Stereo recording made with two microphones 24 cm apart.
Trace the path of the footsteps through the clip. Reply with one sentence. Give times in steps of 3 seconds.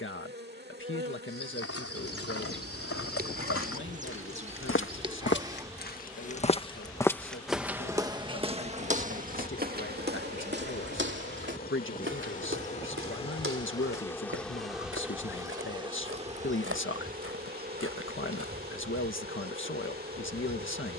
You can hear the footsteps on the left from 0 s, in the centre from 6 s and on the right from 9 s.